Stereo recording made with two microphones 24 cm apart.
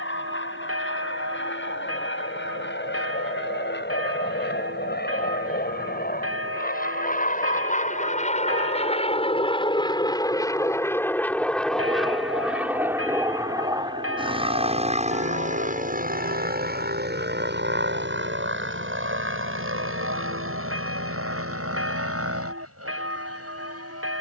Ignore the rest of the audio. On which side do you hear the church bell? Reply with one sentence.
You can hear the church bell on the right.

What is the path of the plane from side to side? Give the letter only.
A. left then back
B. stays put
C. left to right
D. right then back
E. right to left
C.